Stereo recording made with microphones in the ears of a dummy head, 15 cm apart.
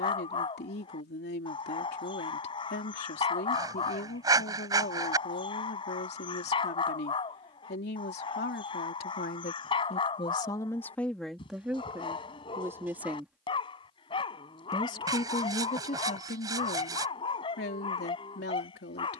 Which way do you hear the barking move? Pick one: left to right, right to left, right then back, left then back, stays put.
stays put.